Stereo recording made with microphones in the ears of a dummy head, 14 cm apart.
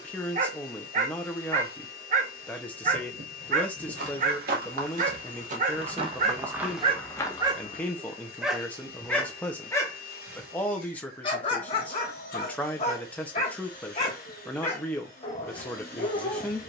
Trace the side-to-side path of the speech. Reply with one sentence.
You can hear the speech stay in one place.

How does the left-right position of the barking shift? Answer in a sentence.
You can hear the barking move from right to left.